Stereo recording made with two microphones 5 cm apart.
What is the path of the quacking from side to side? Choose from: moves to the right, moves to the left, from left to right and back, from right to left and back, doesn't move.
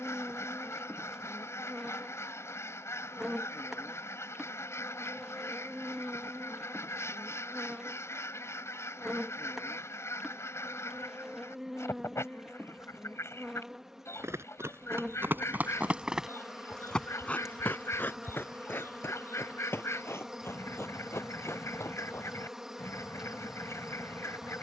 doesn't move.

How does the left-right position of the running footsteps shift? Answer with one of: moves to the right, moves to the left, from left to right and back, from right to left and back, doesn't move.
moves to the left.